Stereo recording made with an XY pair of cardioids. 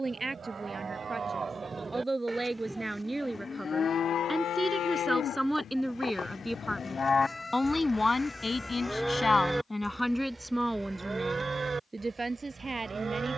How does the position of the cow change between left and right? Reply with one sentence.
In this clip you hear the cow move from right to left and back again.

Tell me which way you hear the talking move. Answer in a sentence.
You can hear the talking go left and come back.